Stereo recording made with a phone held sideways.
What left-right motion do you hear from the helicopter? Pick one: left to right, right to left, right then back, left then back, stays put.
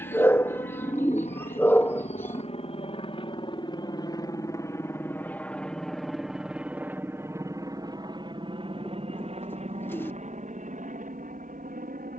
left to right.